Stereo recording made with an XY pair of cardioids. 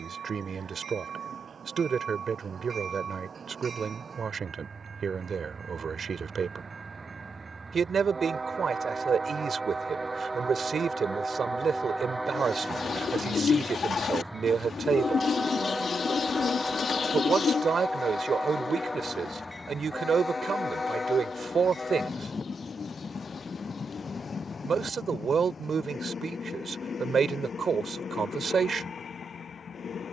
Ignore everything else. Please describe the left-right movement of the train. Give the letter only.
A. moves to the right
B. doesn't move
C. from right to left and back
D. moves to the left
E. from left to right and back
D.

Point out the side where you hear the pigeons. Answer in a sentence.
You can hear the pigeons on the left.